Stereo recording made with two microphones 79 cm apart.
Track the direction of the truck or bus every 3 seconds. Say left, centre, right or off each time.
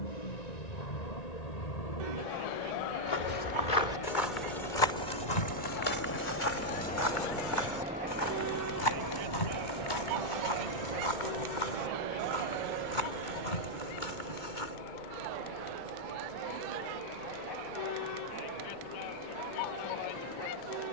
left, left, centre, right, right, right, right.